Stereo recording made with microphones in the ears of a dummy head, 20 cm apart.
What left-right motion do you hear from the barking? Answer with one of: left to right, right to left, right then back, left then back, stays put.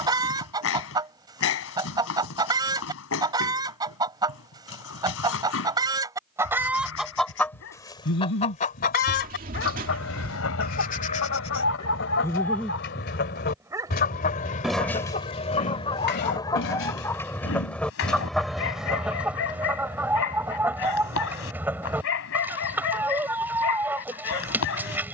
right then back.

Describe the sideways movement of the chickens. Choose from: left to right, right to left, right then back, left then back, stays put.
left then back.